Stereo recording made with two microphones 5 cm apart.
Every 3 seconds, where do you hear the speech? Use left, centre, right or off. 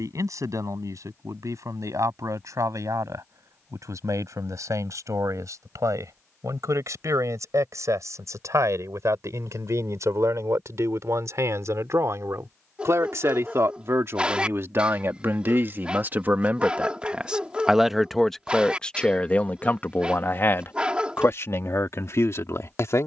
right, right, right, right, right, right, left, left.